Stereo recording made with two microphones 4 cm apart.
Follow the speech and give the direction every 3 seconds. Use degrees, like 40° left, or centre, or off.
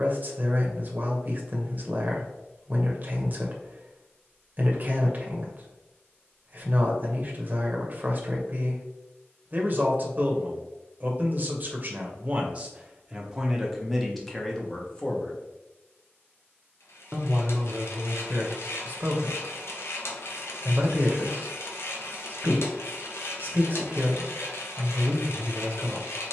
40° right, 40° right, 40° right, 40° right, 10° right, 10° right, 40° right, 40° right, 40° right.